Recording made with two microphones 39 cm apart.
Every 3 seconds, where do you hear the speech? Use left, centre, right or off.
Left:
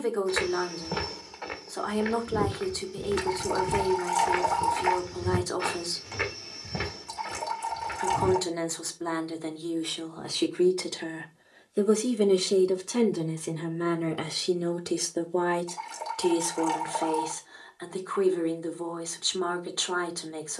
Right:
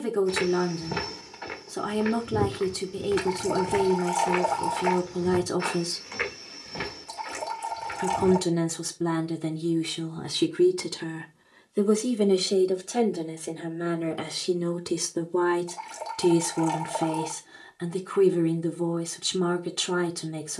right, right, right, right, centre, right, right.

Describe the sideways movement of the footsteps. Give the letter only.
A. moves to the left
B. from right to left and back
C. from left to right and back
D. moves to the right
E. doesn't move
A.